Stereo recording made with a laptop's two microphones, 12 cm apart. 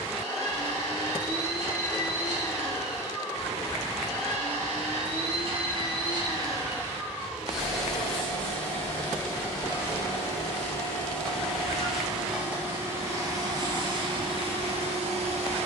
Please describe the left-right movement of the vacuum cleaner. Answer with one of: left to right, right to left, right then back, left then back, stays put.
left then back.